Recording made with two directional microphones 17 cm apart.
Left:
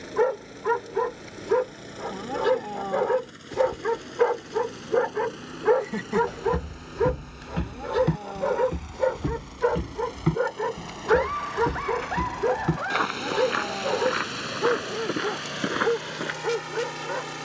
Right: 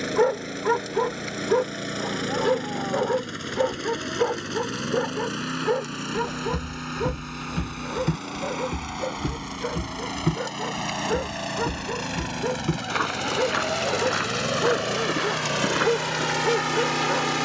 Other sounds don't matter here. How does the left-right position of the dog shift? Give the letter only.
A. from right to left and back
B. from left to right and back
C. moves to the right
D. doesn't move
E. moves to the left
A.